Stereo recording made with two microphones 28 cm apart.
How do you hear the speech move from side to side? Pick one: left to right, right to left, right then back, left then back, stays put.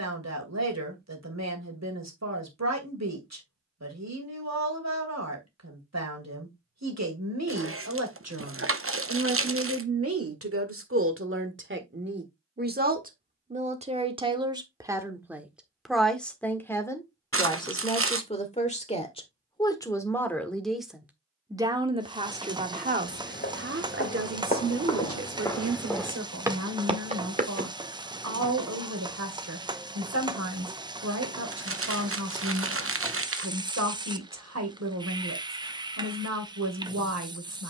left then back.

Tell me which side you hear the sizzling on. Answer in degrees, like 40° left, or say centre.
20° right.